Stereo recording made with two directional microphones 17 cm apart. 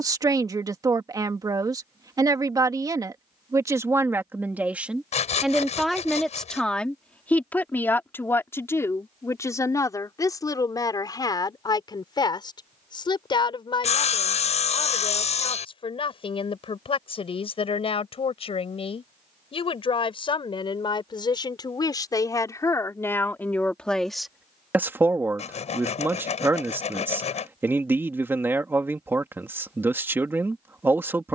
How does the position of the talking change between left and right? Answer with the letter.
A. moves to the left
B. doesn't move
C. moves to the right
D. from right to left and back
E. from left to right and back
D.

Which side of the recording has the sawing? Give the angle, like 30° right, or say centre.
40° left.